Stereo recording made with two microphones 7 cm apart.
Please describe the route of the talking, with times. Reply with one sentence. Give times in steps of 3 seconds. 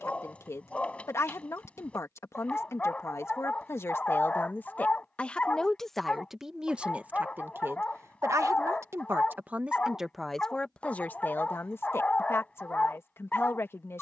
You can hear the talking on the left from 0 s, on the right from 6 s, in the centre from 9 s and on the left from 12 s.